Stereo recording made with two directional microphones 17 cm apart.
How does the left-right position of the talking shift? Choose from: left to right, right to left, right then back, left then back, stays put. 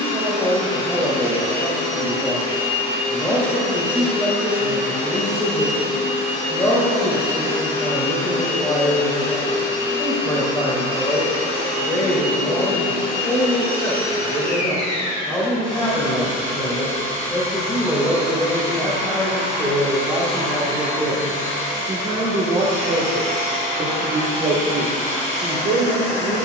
left to right.